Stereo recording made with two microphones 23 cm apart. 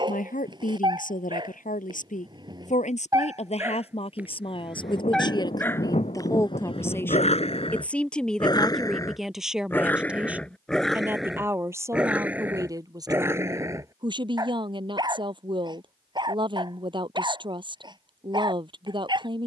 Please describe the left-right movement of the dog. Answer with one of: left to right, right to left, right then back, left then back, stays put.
left then back.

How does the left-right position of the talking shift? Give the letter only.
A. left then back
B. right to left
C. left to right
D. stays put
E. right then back
C.